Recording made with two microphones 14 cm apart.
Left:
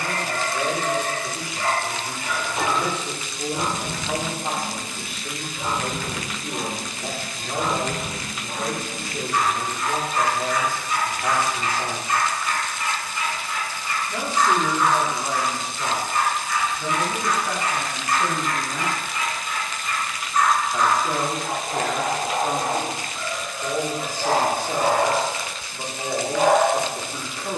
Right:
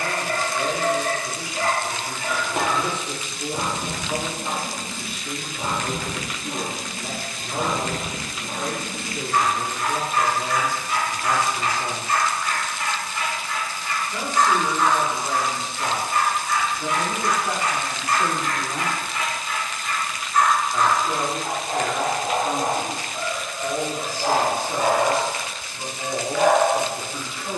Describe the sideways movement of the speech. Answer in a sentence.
In this clip you hear the speech go right and come back.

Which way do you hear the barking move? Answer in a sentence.
You can hear the barking move to the left.